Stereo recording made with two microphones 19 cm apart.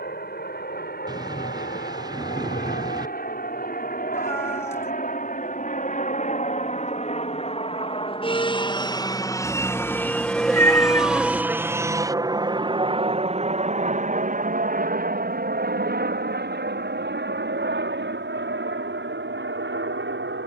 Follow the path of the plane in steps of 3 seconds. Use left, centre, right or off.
left, left, left, centre, right, right, right.